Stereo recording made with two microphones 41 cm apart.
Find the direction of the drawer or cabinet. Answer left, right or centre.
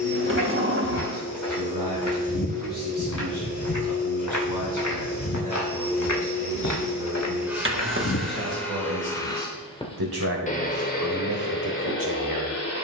right.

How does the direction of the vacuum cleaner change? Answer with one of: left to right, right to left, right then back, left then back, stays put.
right to left.